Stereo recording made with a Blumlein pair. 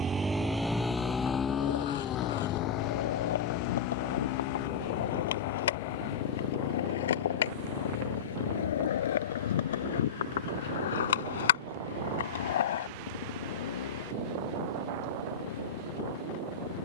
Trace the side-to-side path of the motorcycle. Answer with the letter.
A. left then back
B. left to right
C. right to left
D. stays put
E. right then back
C.